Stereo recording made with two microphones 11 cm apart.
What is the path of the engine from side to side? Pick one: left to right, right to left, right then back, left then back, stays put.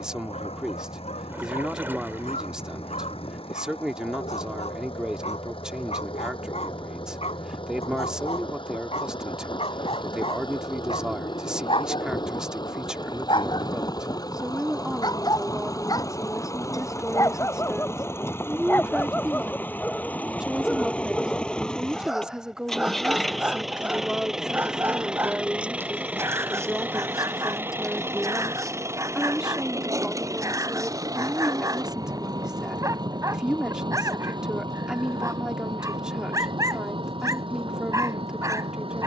left to right.